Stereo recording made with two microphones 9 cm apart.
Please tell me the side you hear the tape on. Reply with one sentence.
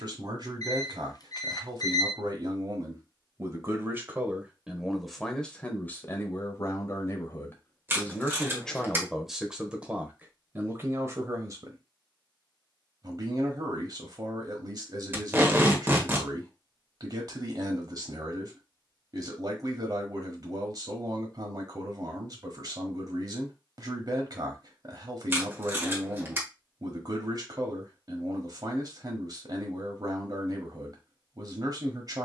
You can hear the tape on the right.